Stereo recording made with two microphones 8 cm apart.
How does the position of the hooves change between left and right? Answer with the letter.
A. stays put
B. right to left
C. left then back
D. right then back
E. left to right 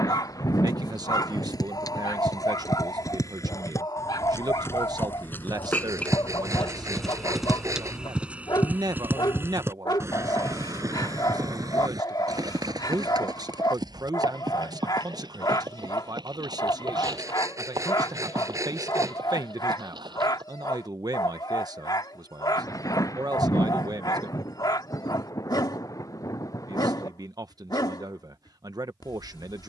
E.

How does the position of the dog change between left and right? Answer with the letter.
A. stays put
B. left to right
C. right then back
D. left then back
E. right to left
A.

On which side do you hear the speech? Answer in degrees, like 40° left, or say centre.
60° right.